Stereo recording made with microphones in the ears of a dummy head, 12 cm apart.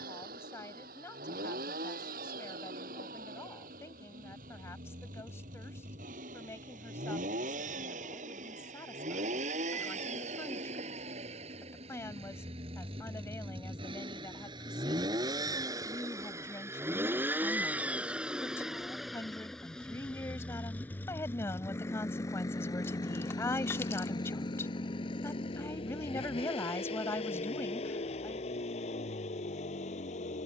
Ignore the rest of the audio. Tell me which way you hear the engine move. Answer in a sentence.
You can hear the engine travel towards the left.